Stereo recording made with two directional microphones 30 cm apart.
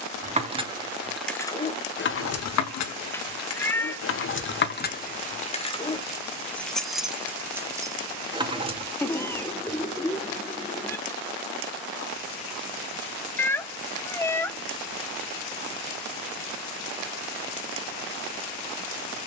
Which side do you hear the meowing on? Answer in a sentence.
You can hear the meowing in the centre.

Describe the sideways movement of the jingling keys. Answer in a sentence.
You can hear the jingling keys move from right to left and back again.